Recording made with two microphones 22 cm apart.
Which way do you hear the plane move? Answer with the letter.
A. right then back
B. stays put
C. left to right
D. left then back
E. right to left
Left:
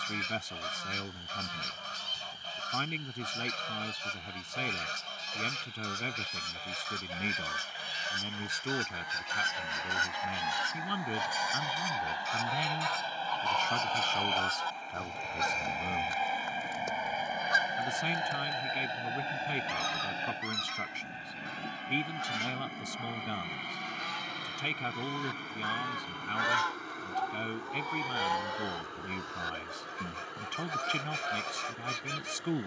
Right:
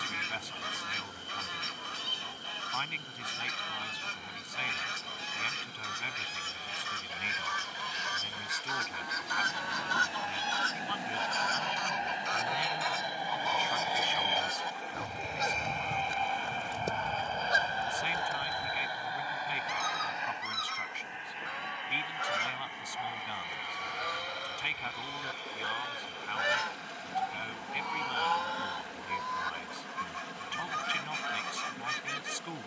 E.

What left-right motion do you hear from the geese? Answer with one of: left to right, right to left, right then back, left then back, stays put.
right then back.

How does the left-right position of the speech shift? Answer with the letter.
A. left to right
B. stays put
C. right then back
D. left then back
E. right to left
B.